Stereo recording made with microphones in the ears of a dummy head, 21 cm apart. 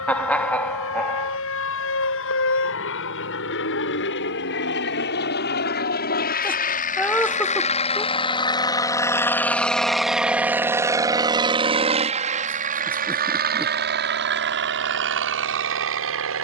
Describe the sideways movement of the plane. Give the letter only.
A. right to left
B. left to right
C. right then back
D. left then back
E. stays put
B.